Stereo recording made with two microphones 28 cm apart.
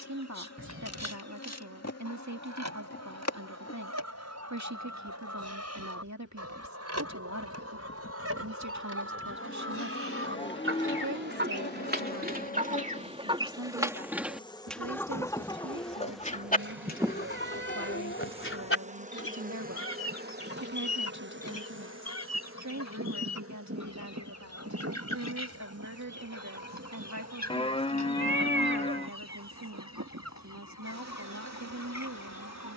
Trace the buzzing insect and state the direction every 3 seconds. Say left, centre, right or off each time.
left, left, left, left, left, centre, right, right, right, right, right.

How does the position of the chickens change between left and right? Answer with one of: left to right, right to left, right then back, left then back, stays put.
right to left.